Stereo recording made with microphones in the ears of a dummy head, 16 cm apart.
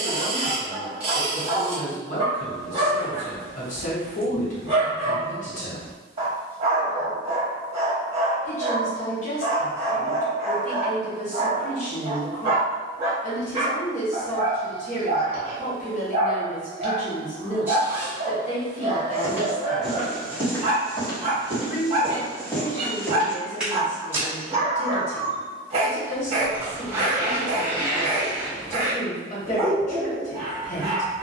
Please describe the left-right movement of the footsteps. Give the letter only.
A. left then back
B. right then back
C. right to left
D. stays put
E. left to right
A.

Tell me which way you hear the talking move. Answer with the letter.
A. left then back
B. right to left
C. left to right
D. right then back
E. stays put
E.